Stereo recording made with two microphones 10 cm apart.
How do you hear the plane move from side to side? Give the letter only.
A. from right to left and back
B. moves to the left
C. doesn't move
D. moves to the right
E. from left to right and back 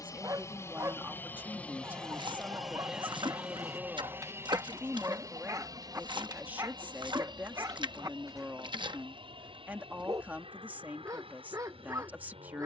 D.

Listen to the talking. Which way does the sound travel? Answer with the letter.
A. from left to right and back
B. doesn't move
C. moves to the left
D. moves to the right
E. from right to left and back
B.